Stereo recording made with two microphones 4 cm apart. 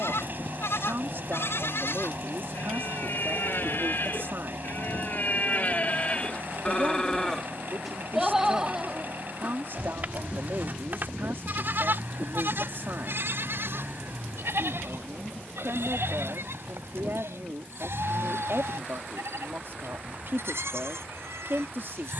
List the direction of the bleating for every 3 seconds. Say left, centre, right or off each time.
left, left, centre, right, right, right, right, right.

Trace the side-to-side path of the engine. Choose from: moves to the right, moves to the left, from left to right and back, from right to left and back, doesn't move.
doesn't move.